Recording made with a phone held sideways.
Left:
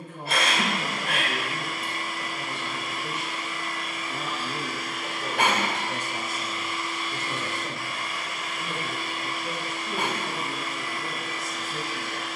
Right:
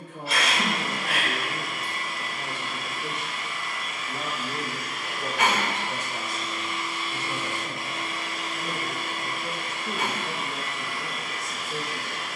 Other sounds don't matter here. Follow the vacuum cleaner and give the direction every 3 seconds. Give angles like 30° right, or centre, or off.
40° left, 30° left, 10° right, 60° right.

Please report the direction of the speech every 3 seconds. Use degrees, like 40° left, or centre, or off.
70° right, 40° right, 10° left, 50° right.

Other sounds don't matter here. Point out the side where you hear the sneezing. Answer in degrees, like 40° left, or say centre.
50° left.